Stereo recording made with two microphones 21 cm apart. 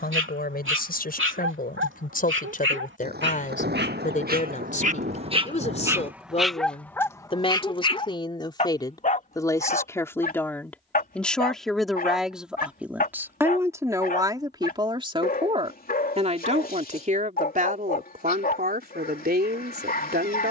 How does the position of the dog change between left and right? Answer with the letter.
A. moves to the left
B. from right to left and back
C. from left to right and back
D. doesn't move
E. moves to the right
A.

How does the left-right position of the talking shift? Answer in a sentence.
You can hear the talking move from left to right.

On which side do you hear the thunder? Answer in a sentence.
You can hear the thunder on the right.